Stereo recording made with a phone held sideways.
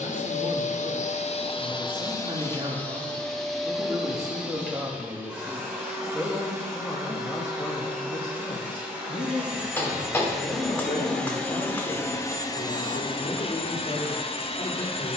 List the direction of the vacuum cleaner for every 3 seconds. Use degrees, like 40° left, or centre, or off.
40° left, 10° right, 10° right, centre, 30° left.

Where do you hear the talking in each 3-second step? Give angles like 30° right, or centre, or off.
30° right, 20° right, 20° left, 50° left, 60° left.